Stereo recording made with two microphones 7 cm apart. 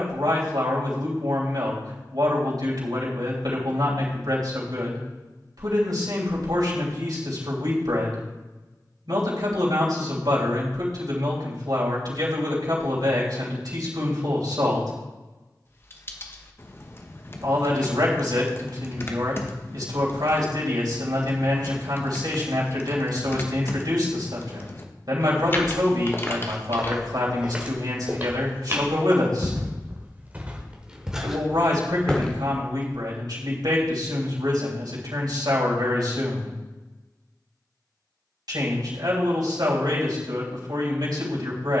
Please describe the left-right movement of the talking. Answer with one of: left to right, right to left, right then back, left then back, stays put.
stays put.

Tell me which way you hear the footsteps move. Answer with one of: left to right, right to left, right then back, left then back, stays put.
right then back.